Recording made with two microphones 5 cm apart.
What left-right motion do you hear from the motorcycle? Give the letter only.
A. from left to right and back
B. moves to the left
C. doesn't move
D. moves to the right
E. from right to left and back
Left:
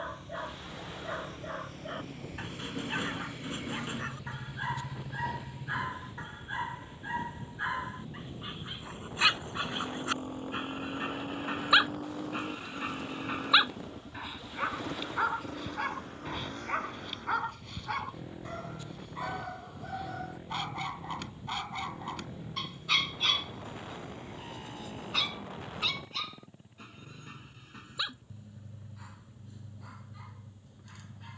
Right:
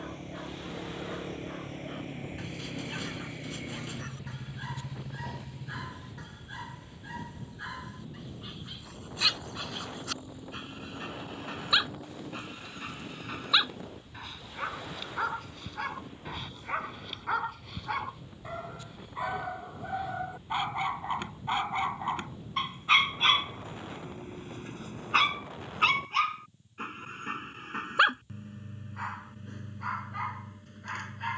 B.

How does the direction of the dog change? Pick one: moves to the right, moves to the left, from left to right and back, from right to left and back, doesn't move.
moves to the right.